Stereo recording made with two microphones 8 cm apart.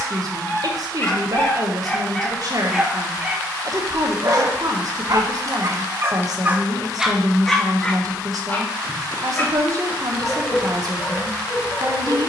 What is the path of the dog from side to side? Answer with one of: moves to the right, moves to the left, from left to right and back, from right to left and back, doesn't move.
from left to right and back.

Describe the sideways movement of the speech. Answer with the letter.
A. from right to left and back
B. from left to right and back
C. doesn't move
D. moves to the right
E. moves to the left
C.